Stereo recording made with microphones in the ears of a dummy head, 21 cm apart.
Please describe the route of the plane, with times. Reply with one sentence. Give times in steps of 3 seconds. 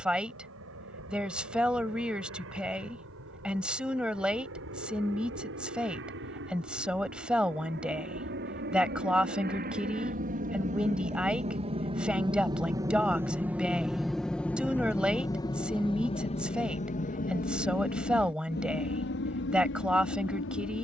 You can hear the plane on the right from 0 s, in the centre from 12 s and on the left from 15 s.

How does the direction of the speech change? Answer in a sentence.
You can hear the speech stay put.